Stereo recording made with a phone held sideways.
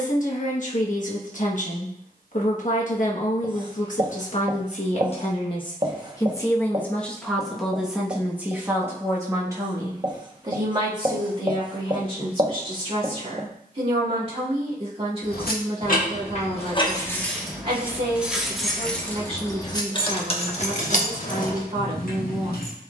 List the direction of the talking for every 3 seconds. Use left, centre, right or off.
left, left, centre, right, right, right, right, right.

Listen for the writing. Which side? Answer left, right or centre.
right.